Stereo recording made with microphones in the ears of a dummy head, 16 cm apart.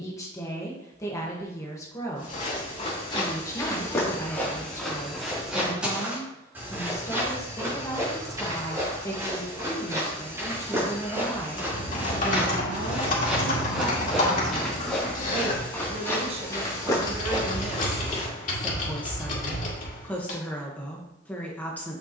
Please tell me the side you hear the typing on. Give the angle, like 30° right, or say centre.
50° left.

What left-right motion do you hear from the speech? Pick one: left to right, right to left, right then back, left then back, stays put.
right then back.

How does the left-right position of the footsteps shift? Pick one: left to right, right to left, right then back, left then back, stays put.
right then back.